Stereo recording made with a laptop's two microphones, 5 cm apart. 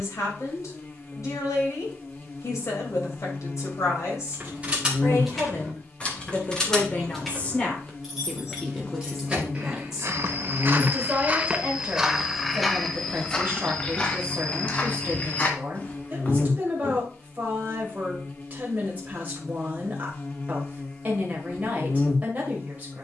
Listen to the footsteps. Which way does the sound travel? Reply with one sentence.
In this clip you hear the footsteps travel towards the left.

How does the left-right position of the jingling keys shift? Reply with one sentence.
In this clip you hear the jingling keys go left and come back.